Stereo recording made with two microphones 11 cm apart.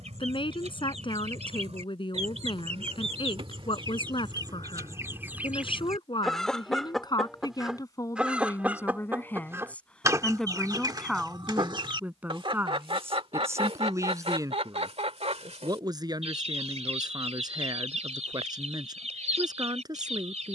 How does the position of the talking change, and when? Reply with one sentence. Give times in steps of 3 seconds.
You can hear the talking on the left from 0 s, in the centre from 9 s and on the right from 12 s.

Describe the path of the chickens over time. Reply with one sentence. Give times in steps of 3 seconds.
In this clip you hear the chickens on the right from 0 s, in the centre from 6 s and on the right from 9 s.